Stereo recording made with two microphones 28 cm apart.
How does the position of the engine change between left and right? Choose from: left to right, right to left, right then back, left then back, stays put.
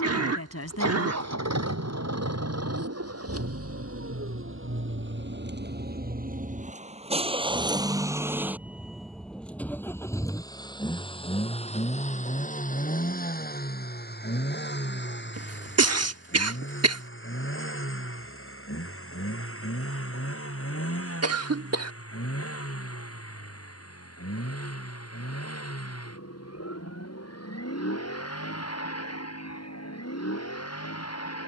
right to left.